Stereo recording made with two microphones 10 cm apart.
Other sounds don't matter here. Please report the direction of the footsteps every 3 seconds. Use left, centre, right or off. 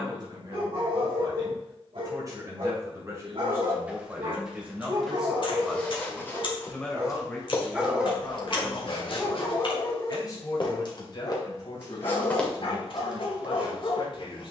off, centre, left, left, centre.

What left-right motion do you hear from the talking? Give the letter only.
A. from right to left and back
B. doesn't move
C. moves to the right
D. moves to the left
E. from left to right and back
D.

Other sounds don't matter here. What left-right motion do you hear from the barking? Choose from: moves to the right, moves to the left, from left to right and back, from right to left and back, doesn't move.
moves to the left.